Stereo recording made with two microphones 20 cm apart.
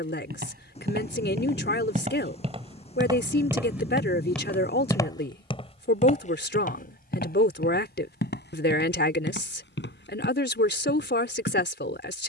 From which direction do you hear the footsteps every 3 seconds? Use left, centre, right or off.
right, centre, left, left.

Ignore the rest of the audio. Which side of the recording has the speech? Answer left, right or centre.
left.